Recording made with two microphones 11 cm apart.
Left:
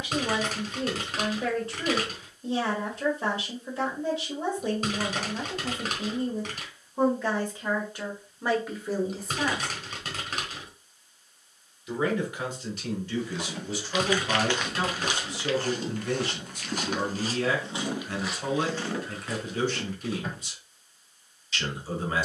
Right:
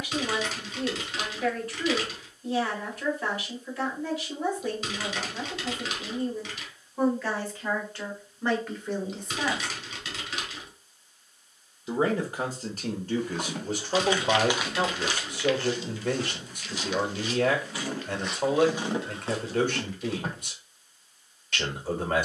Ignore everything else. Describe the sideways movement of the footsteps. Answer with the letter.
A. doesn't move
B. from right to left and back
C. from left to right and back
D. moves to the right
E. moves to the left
B.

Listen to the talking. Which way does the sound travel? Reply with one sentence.
In this clip you hear the talking move to the right.